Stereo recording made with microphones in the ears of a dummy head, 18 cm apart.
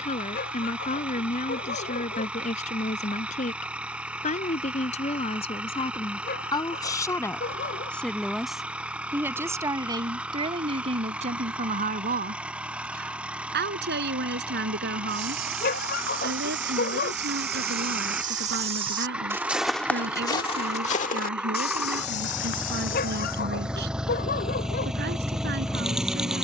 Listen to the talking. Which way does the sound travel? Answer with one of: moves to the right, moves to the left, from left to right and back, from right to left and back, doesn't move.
moves to the right.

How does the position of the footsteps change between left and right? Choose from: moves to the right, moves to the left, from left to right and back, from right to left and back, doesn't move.
moves to the left.